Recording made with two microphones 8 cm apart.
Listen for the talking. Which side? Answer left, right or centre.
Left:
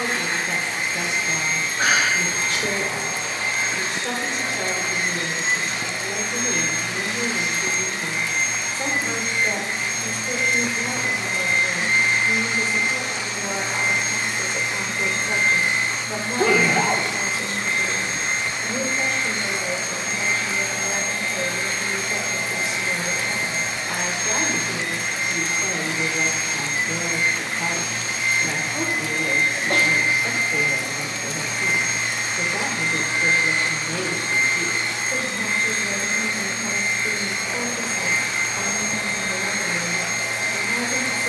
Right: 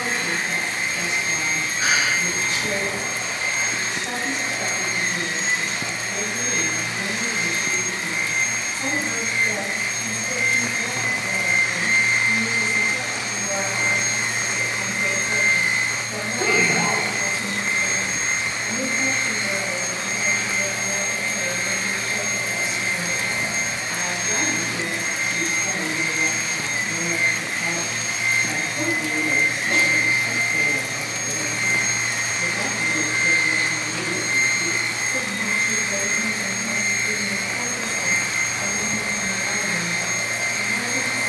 left.